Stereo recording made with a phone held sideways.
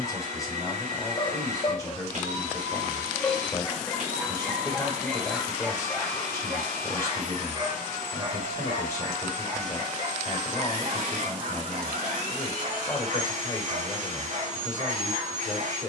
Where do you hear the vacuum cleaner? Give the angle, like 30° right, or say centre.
70° right.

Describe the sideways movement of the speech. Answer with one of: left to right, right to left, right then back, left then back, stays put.
stays put.